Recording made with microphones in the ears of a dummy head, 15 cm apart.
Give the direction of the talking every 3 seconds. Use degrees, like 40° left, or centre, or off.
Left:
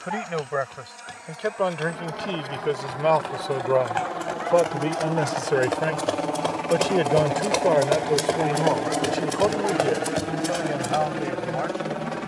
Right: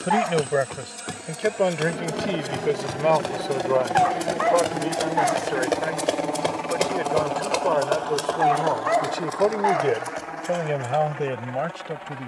20° right, 10° left, 20° left, 30° right.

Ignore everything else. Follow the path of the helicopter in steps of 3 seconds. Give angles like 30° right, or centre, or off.
40° right, 20° right, 10° left, 40° left.